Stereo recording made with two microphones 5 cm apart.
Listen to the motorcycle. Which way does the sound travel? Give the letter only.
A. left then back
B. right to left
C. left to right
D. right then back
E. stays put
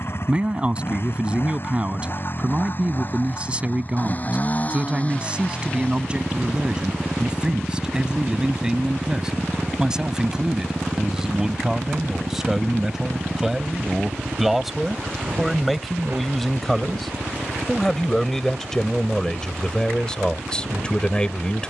C.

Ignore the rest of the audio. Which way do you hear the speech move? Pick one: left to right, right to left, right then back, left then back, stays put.
right to left.